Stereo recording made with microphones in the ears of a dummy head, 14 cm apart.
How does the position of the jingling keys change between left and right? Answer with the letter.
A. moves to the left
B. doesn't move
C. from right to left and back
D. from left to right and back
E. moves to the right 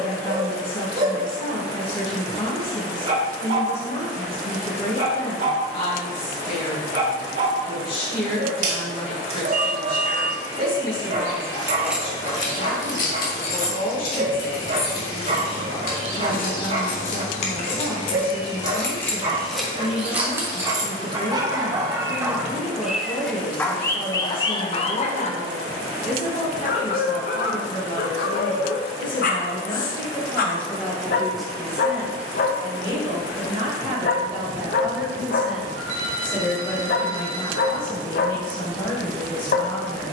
C.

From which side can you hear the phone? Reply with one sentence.
You can hear the phone on the right.